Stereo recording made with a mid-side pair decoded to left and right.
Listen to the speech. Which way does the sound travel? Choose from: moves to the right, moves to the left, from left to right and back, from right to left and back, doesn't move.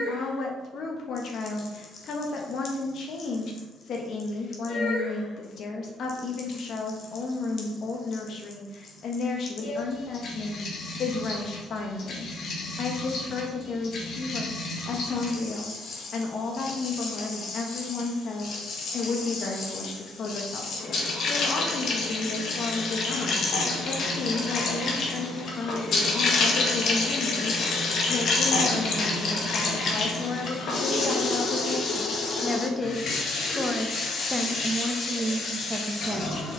moves to the right.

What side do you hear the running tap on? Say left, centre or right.
left.